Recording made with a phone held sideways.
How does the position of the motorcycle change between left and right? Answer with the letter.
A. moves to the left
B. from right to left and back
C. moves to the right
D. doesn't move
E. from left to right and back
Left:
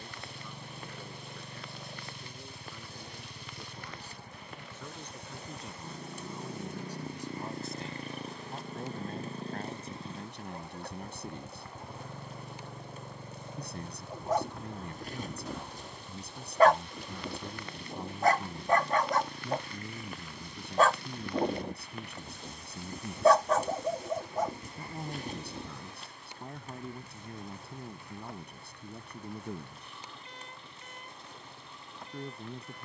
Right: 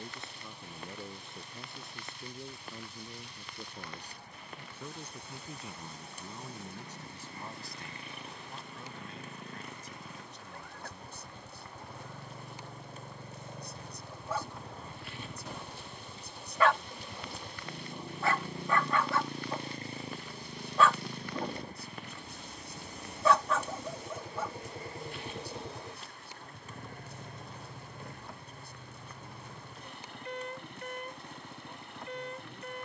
C.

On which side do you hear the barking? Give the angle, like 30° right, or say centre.
40° left.